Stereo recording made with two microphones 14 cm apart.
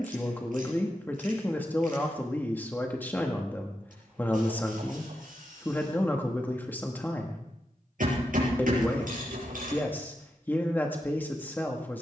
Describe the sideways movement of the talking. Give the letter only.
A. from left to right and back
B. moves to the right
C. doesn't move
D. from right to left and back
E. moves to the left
C.